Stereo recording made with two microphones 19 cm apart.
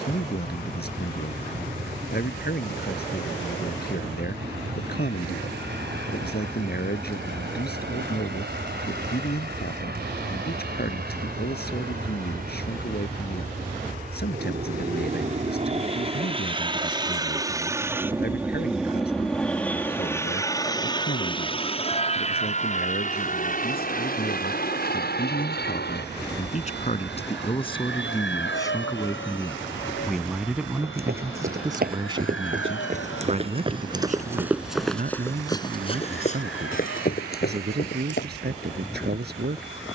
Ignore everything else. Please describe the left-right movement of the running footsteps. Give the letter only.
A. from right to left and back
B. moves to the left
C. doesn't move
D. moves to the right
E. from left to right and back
B.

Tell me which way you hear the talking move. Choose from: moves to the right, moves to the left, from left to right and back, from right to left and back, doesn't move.
moves to the right.